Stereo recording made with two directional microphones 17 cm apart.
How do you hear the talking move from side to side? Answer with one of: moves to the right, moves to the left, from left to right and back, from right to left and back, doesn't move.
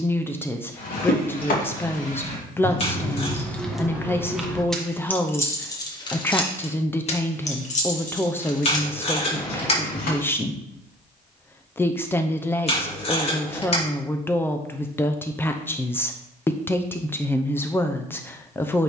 doesn't move.